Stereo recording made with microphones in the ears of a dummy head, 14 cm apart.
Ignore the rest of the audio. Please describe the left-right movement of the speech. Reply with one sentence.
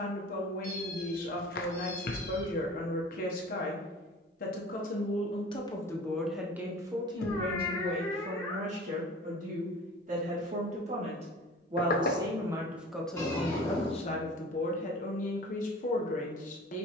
In this clip you hear the speech move from left to right and back again.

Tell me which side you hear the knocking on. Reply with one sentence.
You can hear the knocking on the left.